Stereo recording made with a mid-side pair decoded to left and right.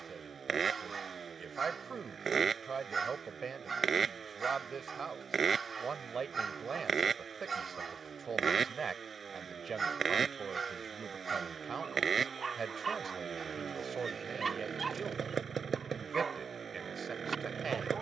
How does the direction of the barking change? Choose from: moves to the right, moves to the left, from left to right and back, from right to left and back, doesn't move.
doesn't move.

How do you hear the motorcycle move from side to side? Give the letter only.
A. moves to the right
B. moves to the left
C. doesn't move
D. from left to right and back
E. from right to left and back
C.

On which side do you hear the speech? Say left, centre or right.
right.